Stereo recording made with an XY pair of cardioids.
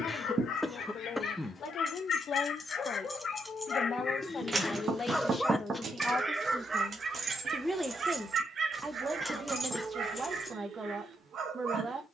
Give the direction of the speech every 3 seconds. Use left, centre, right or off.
left, left, centre, right.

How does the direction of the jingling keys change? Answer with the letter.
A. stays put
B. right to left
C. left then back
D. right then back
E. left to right
D.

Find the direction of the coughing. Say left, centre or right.
centre.